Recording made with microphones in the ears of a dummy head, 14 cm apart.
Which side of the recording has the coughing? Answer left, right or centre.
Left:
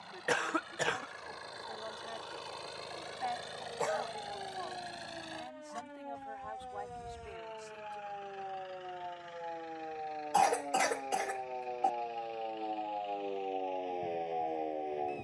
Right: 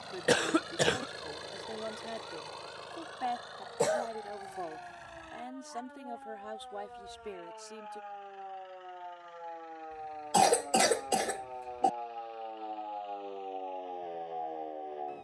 right.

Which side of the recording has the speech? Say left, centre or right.
right.